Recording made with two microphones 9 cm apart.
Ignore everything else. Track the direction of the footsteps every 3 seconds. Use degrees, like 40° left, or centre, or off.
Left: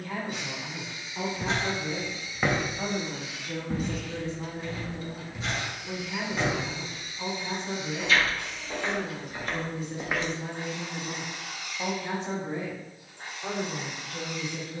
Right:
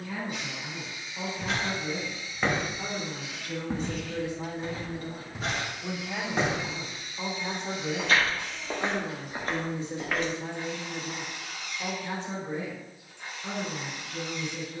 20° left, 30° right, 50° right, centre, off.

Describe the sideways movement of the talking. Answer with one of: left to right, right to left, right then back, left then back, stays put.
right then back.